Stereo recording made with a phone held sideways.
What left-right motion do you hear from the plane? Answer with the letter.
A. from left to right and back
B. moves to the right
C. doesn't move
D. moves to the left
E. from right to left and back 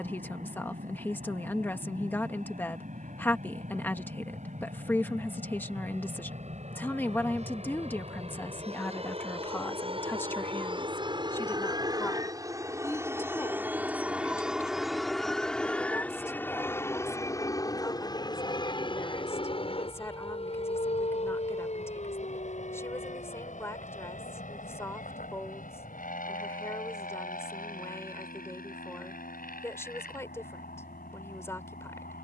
D.